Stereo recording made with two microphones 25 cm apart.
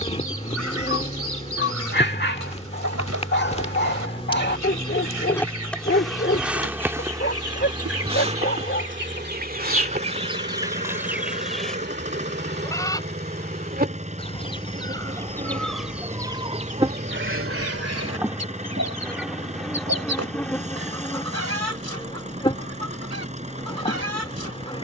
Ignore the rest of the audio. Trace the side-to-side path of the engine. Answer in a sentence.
In this clip you hear the engine stay put.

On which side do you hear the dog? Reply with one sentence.
You can hear the dog on the left.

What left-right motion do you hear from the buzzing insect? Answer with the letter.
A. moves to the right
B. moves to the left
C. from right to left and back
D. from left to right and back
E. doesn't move
D.